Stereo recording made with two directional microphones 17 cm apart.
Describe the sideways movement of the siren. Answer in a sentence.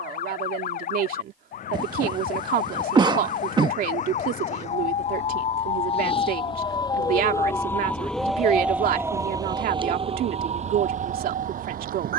In this clip you hear the siren move to the right.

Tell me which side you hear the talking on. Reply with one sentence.
You can hear the talking on the right.